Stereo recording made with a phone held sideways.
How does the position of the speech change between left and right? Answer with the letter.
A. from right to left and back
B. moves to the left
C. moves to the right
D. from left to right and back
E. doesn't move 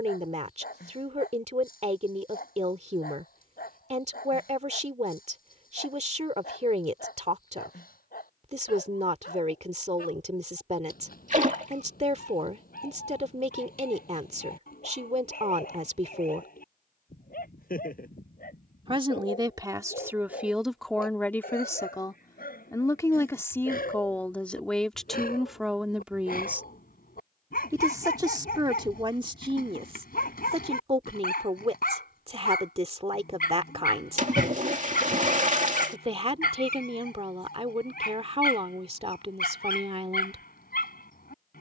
A.